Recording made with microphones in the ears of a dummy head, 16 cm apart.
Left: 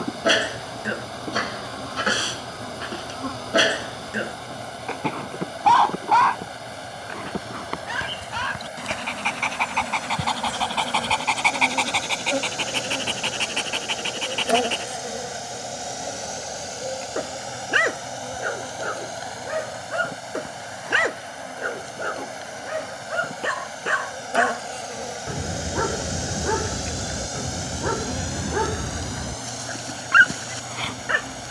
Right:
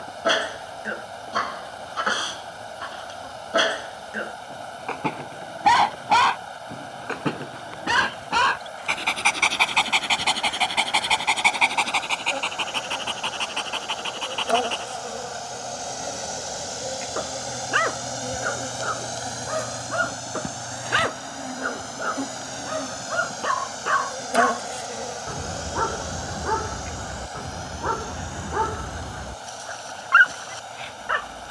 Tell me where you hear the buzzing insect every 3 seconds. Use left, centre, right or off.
left, left, left, left, left, centre, right, right, centre, left, left.